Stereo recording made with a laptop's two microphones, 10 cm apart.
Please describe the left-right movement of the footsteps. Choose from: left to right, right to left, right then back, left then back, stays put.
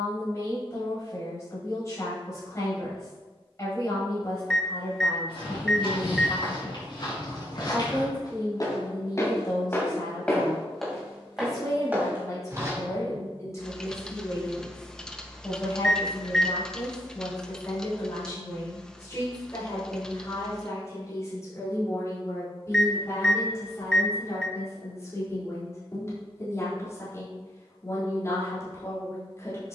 left to right.